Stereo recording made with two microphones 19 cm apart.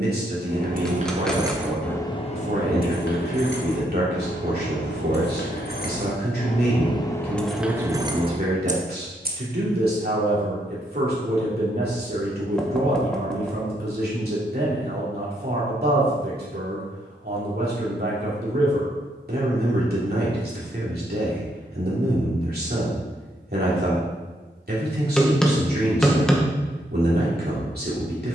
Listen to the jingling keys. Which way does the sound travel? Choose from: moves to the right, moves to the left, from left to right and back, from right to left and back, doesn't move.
from right to left and back.